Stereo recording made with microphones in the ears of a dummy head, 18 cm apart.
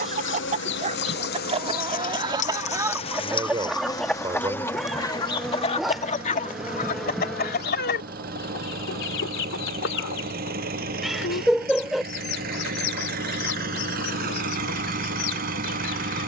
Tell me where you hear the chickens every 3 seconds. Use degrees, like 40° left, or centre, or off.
30° right, 10° left, 50° left, 70° left, 80° left, 80° left.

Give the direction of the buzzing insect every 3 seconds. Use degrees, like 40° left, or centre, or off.
50° left, 10° left, centre, 30° left, 50° left, 70° left.